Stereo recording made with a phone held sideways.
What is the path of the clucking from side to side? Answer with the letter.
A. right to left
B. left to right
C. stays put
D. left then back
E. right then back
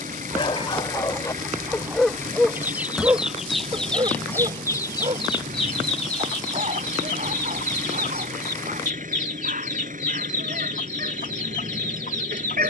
A.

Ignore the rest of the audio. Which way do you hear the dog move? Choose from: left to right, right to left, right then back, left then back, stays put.
left to right.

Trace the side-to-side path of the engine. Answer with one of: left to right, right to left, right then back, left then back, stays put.
stays put.